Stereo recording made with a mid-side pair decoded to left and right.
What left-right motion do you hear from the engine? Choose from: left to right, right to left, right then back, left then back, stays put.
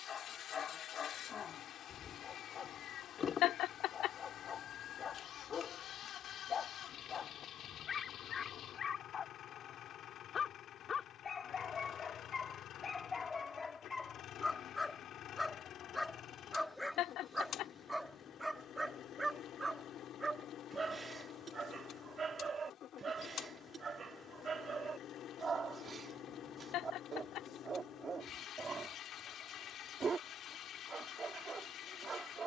stays put.